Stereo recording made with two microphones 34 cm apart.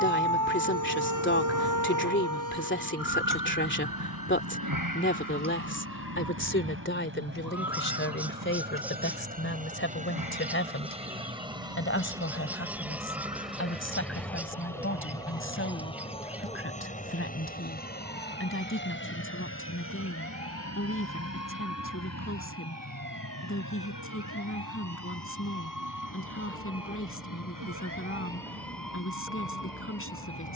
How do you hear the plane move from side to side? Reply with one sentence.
In this clip you hear the plane move from right to left.